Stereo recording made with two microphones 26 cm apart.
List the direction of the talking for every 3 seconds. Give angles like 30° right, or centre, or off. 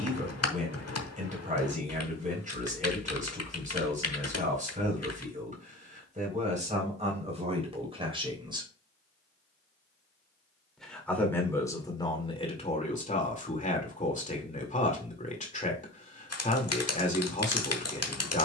30° right, 30° right, 20° right, 10° left, 30° left, 30° left.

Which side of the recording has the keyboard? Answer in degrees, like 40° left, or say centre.
70° left.